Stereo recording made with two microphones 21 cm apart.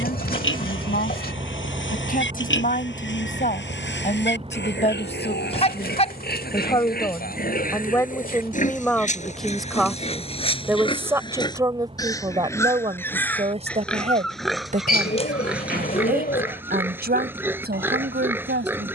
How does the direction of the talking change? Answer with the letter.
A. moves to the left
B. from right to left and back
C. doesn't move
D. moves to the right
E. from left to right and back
D.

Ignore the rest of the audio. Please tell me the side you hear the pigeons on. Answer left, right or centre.
left.